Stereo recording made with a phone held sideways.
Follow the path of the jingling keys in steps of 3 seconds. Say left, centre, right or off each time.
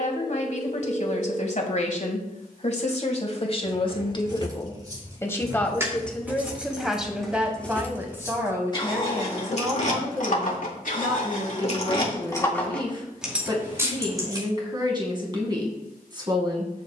off, right, centre, left, centre, off.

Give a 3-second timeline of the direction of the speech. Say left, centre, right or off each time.
left, left, centre, right, right, right.